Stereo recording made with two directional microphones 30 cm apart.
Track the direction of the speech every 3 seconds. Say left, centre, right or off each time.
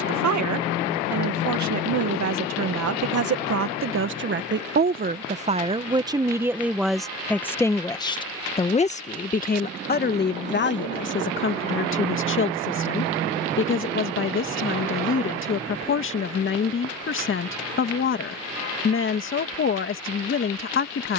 right, right, centre, left, left, left, left.